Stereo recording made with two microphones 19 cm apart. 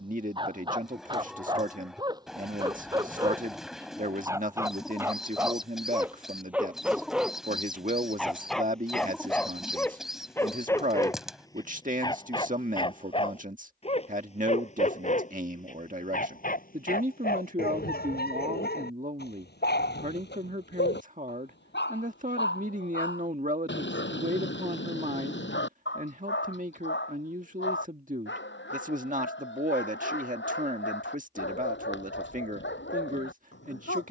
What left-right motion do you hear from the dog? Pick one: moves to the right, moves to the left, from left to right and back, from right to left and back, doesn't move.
moves to the left.